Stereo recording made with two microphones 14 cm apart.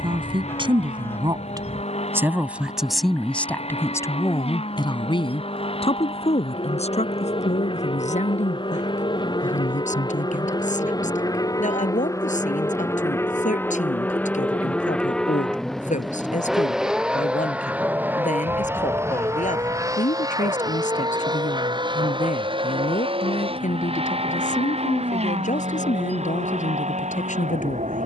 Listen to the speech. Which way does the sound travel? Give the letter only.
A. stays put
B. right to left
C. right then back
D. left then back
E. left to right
B.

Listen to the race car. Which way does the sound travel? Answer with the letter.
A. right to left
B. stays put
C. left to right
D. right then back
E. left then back
C.